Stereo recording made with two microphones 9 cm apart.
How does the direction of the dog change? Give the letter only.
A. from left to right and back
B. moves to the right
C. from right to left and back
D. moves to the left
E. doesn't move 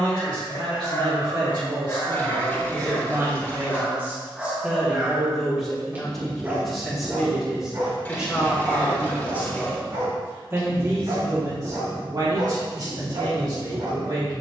B.